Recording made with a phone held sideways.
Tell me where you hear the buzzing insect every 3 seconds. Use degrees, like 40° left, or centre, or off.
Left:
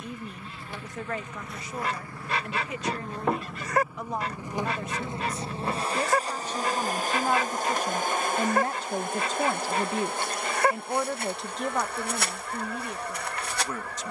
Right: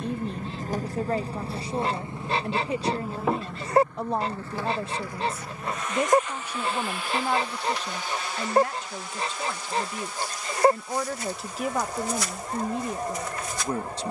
30° right, 10° left, 40° left, 60° left, 60° left.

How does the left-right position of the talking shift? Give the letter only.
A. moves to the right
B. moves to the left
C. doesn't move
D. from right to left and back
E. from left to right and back
D.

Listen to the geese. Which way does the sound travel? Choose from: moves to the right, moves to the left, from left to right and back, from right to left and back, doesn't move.
doesn't move.